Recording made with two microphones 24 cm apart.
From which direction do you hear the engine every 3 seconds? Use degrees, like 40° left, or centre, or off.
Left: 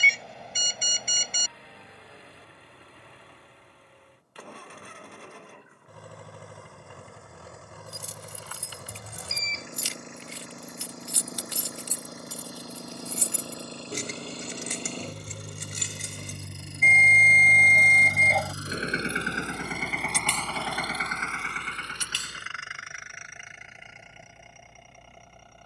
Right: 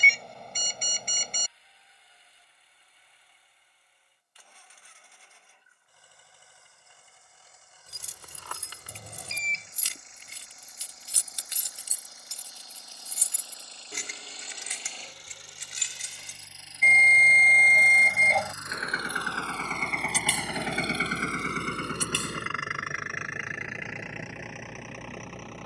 70° left, 70° left, 70° left, 70° left, 60° left, 50° left, 10° left, 60° right, 80° right.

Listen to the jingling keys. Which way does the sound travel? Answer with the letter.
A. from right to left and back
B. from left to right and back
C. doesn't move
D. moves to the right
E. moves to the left
E.